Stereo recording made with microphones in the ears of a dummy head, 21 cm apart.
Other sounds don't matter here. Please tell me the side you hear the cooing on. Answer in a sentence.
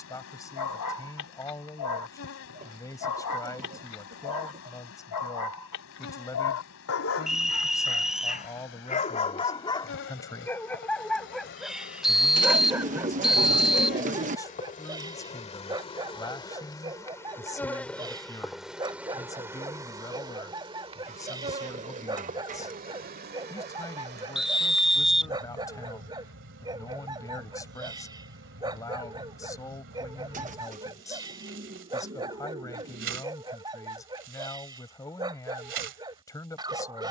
You can hear the cooing on the right.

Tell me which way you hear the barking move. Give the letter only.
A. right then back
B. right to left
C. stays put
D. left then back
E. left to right
E.